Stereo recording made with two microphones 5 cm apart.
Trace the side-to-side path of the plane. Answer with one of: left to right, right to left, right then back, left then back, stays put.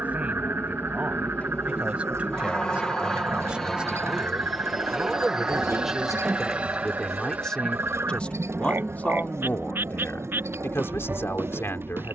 left to right.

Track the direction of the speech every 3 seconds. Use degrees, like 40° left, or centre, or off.
30° right, 10° right, 20° left, 50° left.